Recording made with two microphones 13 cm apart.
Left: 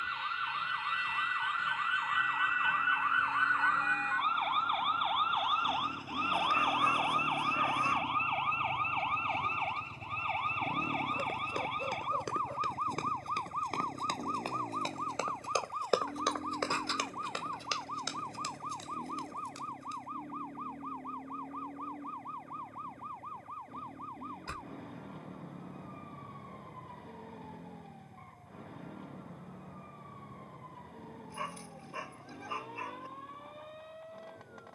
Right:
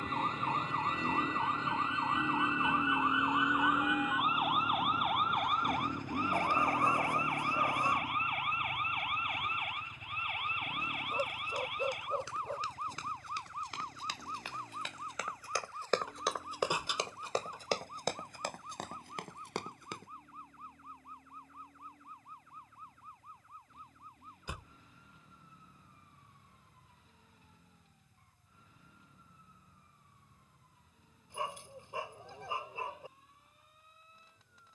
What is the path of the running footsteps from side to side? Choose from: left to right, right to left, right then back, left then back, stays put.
left to right.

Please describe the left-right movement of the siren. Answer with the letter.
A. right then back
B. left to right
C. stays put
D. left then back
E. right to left
E.